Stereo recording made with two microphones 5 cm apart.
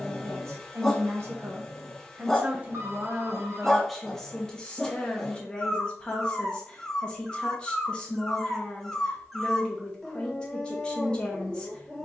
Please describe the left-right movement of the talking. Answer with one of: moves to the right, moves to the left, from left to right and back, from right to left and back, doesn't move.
moves to the left.